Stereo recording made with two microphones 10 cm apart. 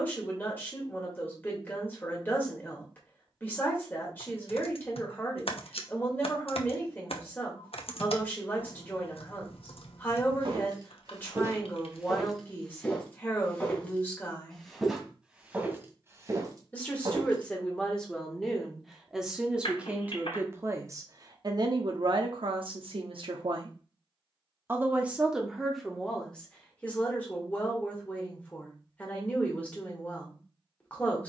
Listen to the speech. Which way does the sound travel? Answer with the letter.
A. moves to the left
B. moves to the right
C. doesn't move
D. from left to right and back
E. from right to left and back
D.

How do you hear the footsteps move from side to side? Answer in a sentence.
In this clip you hear the footsteps go left and come back.